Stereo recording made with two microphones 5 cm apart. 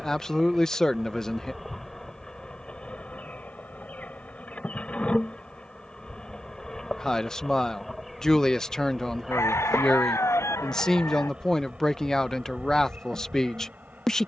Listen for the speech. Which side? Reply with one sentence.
You can hear the speech in the centre.